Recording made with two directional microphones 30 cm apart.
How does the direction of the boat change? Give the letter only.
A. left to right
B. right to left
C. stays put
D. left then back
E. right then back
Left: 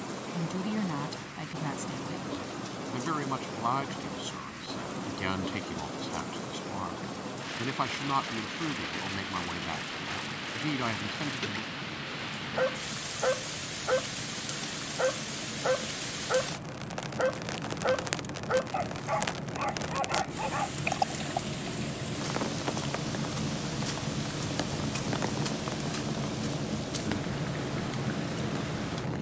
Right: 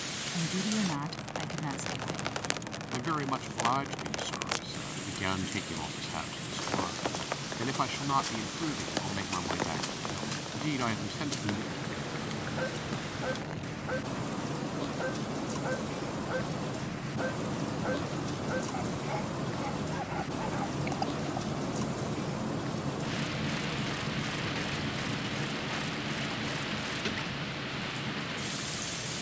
B.